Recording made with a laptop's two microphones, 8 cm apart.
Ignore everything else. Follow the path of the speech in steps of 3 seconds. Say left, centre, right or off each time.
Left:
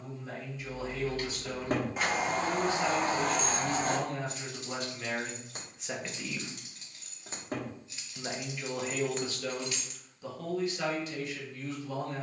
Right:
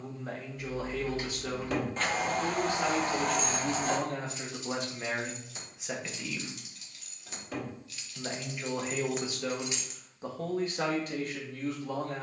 right, right, centre, right.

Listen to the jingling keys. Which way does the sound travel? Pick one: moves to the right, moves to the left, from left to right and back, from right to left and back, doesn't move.
from right to left and back.